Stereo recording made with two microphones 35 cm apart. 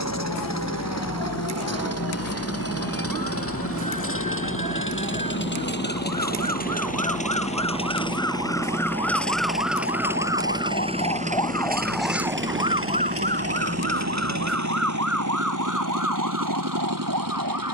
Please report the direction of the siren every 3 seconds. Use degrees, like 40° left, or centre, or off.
80° left, 70° left, 60° left, 30° left, 30° right, 60° right.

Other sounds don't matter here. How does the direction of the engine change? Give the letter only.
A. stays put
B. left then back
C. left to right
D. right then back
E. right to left
C.